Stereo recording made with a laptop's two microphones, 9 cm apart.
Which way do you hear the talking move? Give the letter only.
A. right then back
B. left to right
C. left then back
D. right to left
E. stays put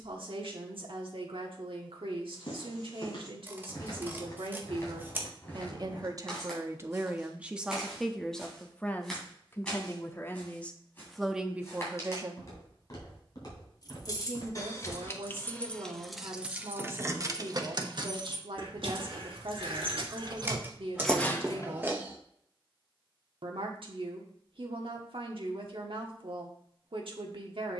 C.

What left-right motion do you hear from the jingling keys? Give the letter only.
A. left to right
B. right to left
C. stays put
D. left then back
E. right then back
E.